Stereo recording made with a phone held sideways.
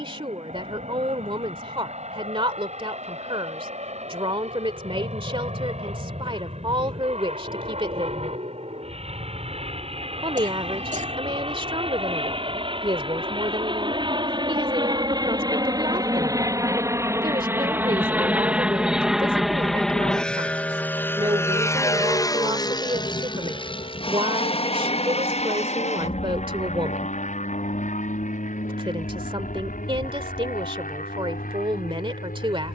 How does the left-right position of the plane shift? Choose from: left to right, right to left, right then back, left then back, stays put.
right to left.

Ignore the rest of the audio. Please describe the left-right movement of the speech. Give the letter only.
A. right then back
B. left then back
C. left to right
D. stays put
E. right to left
D.